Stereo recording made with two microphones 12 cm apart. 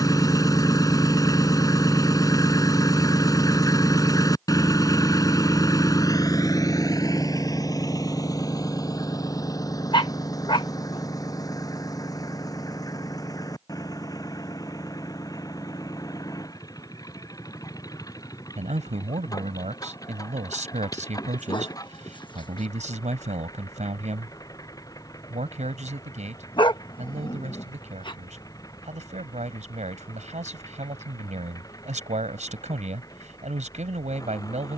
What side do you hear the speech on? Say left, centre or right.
right.